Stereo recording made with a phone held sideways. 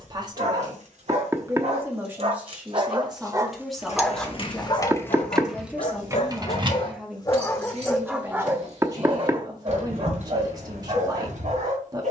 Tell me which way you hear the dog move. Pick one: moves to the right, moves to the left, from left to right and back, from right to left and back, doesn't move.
from right to left and back.